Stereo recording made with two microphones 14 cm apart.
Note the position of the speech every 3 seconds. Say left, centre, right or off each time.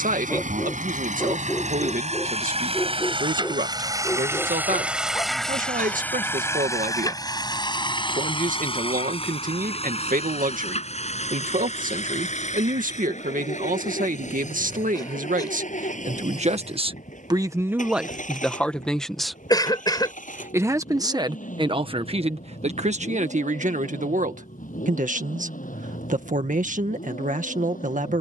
right, right, right, right, right, right, centre, right, right, right.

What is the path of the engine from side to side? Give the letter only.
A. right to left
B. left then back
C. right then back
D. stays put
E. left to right
A.